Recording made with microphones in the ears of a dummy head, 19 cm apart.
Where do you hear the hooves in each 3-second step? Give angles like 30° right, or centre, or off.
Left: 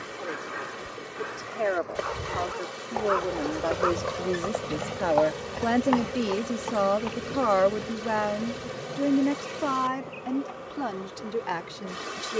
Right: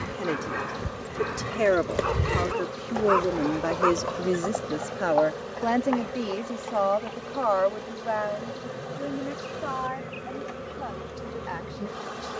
60° right, 30° left, 60° left, off.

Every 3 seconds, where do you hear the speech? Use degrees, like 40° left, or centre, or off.
40° right, 10° right, 30° left, 60° left.